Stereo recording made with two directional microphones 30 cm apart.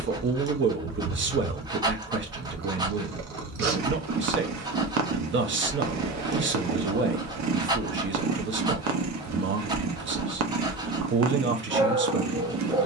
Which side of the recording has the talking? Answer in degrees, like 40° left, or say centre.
40° right.